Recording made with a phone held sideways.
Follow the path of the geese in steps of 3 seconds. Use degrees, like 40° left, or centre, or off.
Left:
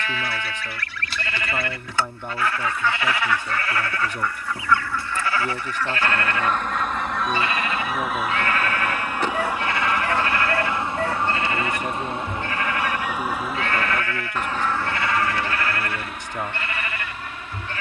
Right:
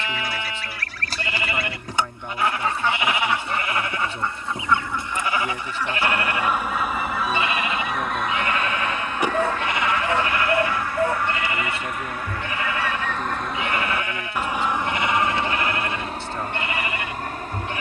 40° right, 20° right, centre, 20° left, 10° left, 40° right.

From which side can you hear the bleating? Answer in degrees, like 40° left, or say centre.
20° right.